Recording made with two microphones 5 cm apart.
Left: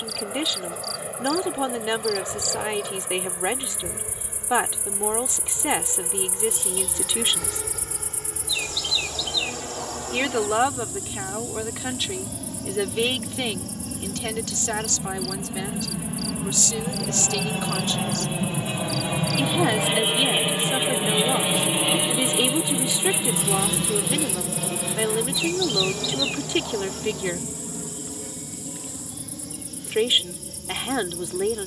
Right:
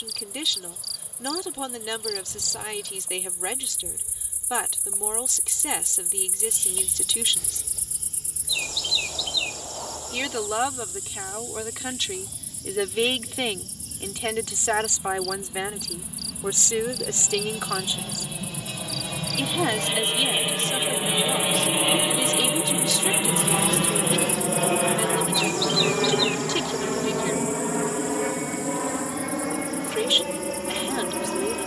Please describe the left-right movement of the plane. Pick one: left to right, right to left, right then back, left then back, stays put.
left to right.